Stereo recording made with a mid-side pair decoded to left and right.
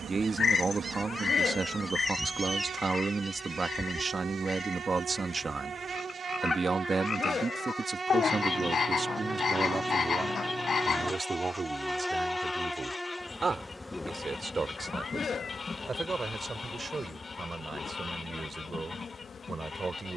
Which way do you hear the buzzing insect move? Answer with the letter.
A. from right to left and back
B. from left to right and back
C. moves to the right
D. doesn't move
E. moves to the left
E.